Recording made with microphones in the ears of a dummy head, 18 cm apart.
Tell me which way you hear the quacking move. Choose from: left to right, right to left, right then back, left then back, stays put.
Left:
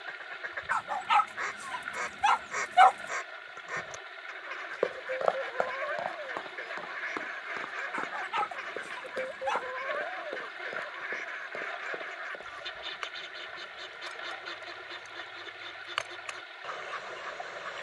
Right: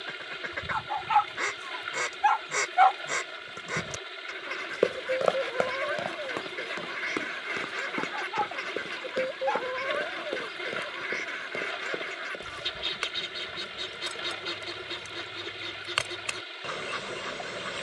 stays put.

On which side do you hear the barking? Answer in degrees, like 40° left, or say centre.
50° left.